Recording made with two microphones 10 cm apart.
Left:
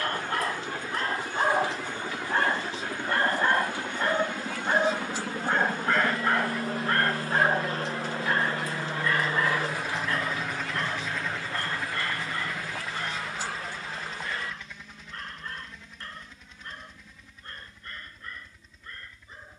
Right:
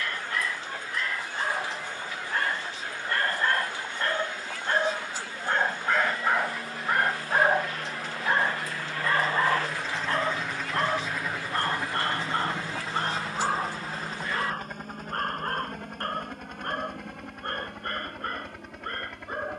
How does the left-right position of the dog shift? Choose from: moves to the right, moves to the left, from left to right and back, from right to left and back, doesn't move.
moves to the right.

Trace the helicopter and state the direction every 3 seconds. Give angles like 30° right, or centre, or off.
60° left, 60° left, 40° left, centre, 40° right, 60° right, 70° right.